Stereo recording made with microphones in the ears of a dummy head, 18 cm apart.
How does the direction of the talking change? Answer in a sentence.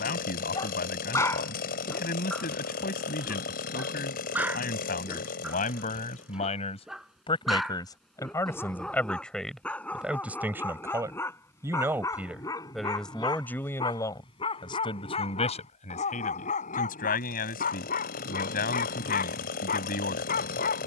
In this clip you hear the talking go right and come back.